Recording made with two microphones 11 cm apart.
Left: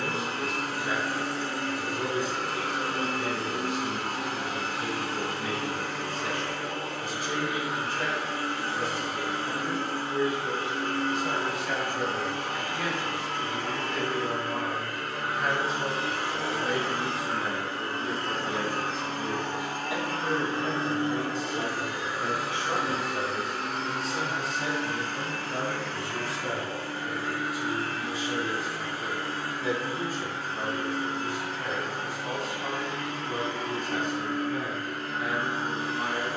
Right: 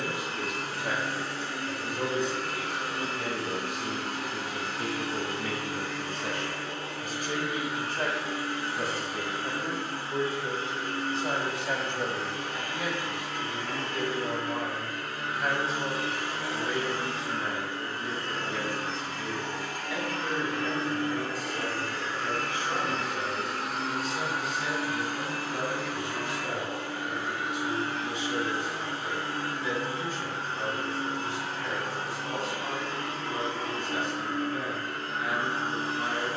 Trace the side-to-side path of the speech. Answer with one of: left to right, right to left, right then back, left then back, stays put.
right to left.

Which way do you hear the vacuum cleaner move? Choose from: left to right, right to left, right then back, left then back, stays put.
left to right.